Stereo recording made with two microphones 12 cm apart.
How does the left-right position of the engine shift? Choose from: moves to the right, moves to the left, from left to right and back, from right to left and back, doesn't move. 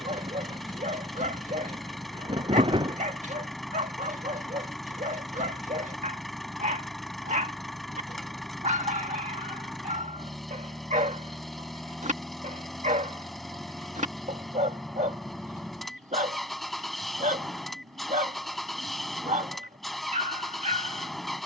doesn't move.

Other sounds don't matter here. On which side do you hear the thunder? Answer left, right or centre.
right.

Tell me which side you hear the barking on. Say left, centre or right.
right.